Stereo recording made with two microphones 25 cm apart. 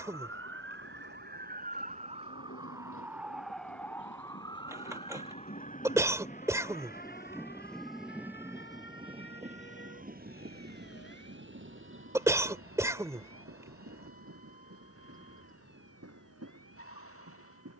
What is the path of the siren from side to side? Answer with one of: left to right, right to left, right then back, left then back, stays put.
right to left.